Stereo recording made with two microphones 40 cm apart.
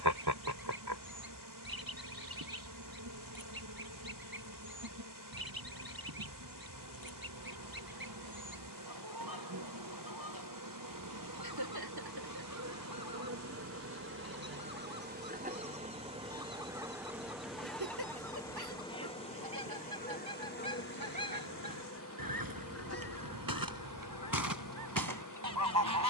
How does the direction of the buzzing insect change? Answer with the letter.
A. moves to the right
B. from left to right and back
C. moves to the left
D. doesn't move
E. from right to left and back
C.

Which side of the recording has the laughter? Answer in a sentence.
In this clip you hear the laughter on the right.